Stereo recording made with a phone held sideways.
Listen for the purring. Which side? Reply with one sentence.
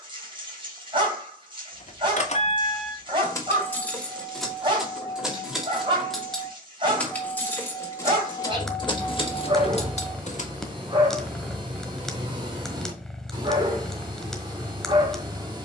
In this clip you hear the purring in the centre.